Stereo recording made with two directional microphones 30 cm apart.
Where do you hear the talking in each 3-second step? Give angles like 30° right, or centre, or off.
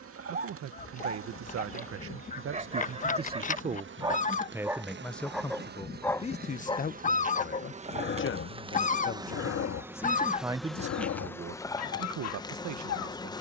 50° right, 10° right, 30° left, 10° right, 60° right.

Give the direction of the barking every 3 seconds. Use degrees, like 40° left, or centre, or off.
30° right, 10° right, 30° left, 50° left, 60° left.